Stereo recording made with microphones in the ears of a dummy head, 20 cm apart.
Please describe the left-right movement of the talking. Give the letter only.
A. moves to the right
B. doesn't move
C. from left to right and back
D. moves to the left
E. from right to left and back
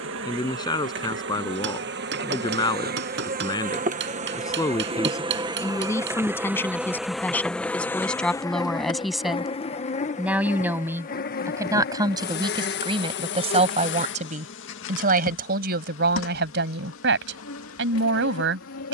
A.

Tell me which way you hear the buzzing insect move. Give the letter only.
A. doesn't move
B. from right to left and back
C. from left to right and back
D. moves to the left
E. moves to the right
D.